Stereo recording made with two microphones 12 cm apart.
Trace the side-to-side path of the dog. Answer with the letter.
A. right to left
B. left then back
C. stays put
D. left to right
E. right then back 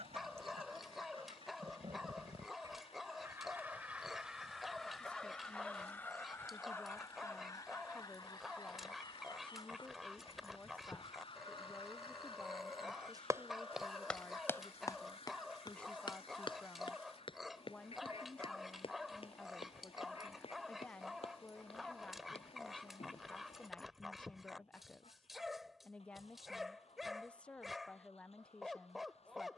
C.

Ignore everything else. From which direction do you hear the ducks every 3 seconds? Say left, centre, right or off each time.
right, centre, left, left, left, left, left, left, left, left.